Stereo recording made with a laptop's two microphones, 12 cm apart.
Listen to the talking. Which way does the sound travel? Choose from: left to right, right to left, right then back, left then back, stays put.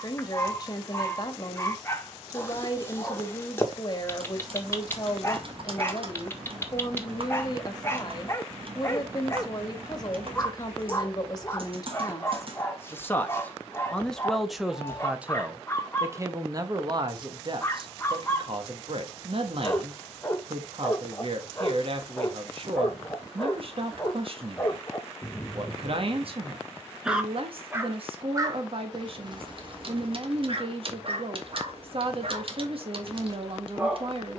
left to right.